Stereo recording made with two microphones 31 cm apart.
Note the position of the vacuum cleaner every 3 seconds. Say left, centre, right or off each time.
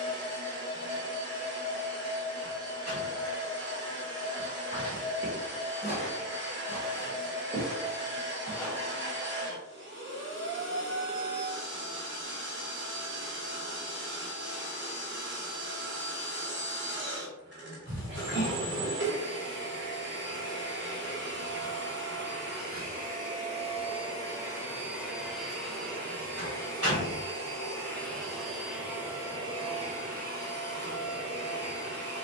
right, right, right, right, right, right, right, right, centre, centre, right.